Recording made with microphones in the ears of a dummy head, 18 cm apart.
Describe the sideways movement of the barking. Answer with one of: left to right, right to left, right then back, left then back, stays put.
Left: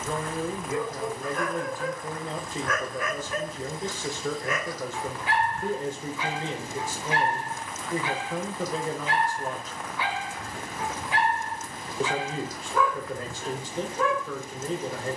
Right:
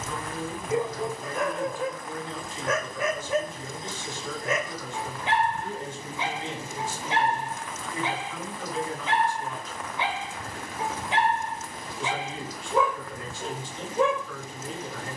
stays put.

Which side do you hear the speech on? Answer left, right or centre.
left.